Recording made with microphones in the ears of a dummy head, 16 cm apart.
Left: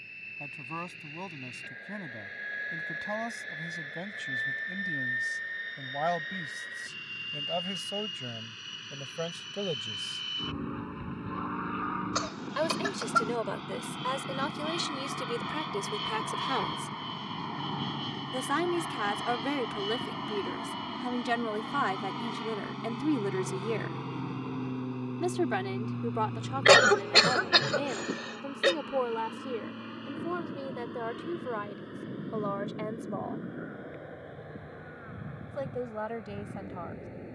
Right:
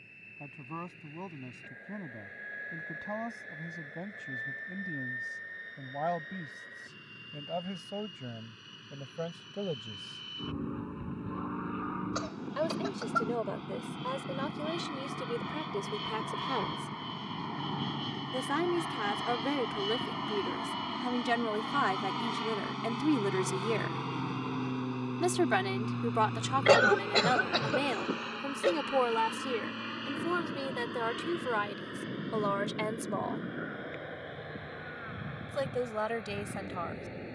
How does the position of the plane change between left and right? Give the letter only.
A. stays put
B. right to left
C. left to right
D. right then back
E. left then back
C.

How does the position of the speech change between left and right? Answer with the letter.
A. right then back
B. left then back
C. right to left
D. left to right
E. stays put
D.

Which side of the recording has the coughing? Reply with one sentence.
In this clip you hear the coughing on the left.